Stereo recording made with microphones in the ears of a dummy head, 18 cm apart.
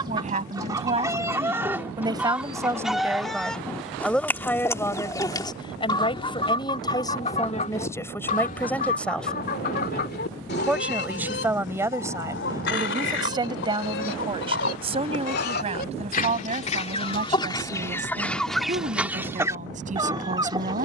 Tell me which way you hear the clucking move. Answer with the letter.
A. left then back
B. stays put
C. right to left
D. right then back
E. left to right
A.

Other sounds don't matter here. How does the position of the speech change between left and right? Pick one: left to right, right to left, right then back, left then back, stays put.
left then back.